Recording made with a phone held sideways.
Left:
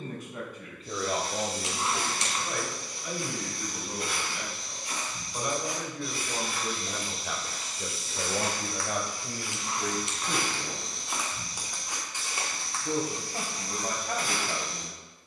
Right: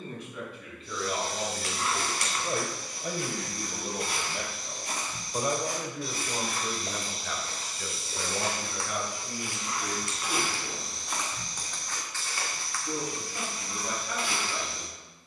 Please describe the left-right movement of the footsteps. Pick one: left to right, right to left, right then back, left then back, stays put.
right to left.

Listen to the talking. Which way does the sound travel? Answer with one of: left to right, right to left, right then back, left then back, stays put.
right then back.